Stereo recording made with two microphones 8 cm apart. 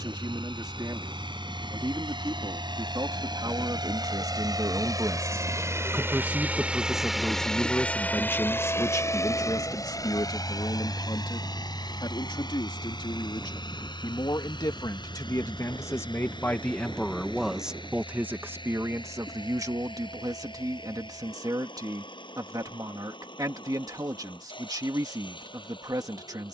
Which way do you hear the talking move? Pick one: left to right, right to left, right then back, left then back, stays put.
left then back.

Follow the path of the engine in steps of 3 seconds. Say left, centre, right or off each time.
right, right, centre, left, left, left, left, left, left.